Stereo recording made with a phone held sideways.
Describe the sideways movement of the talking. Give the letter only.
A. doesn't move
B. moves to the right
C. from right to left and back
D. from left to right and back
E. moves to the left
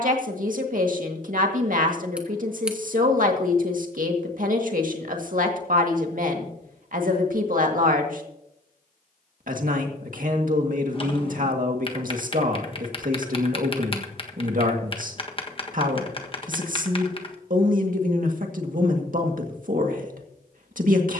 A.